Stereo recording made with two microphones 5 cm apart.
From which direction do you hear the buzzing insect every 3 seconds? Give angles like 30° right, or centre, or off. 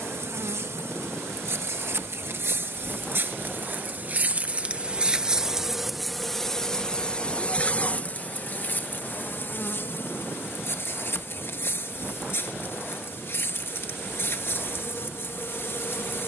60° right, 30° right, 20° left, 50° left, 50° left, 50° left.